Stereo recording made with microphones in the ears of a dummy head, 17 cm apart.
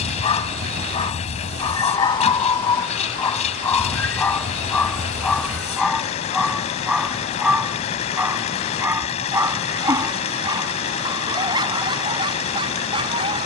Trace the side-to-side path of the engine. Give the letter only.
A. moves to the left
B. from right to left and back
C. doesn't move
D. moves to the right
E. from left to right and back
C.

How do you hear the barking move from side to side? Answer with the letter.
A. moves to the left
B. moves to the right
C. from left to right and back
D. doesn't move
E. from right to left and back
B.